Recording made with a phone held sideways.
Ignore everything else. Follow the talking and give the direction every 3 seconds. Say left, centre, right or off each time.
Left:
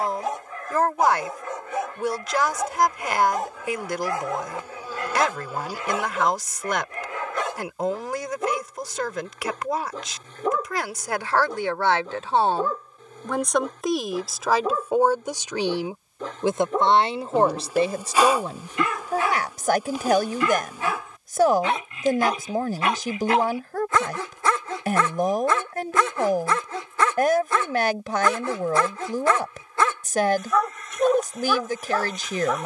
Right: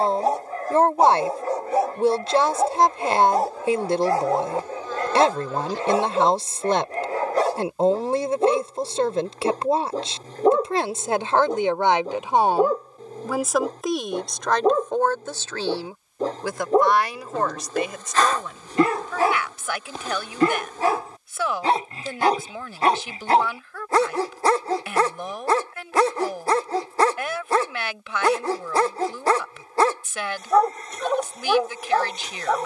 right, right, right, right, centre, left, left, left, left, left, left.